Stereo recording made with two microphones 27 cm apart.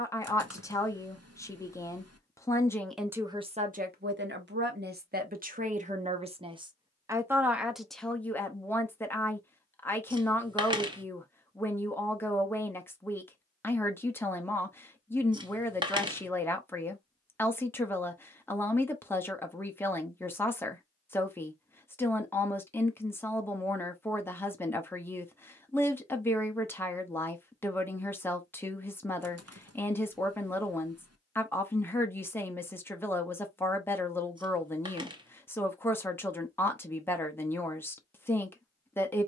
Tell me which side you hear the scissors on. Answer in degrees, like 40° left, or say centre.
20° right.